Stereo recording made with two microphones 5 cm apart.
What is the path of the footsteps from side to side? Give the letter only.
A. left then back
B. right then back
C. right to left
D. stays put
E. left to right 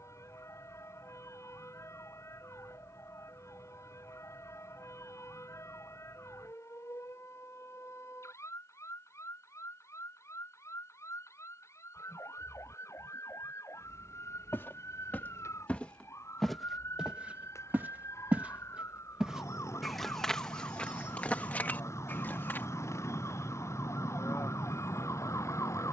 B.